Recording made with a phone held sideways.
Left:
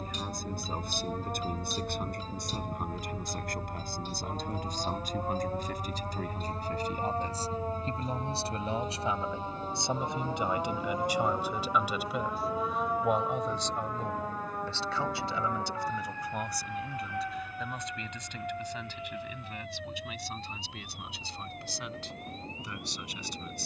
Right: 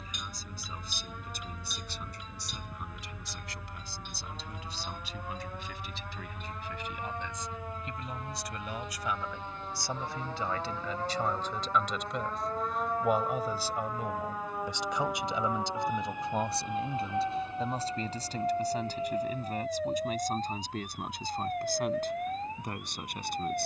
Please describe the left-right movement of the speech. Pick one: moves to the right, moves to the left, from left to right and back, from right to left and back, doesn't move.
moves to the right.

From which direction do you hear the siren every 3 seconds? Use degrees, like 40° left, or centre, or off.
50° left, 40° left, 30° left, 20° left, centre, 20° right, 40° right, 50° right.